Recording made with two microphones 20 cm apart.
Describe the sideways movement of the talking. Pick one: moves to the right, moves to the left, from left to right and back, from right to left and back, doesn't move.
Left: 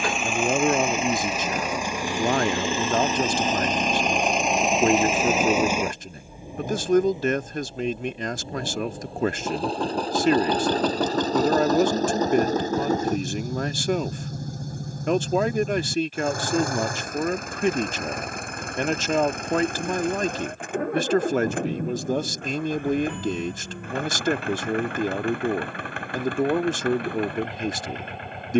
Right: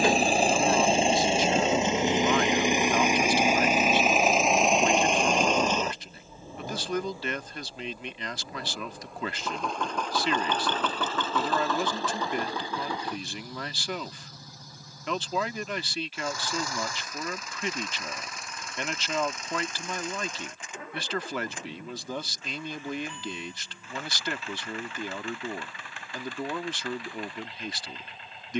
doesn't move.